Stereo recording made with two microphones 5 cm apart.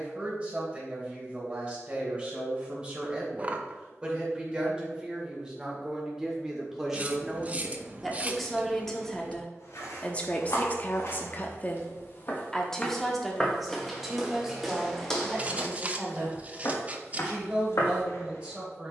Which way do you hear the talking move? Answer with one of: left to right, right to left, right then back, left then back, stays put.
left then back.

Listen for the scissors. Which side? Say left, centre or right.
right.